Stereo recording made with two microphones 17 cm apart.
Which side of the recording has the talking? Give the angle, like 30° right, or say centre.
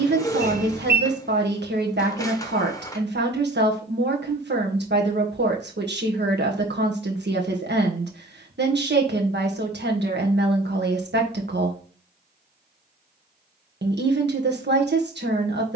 80° right.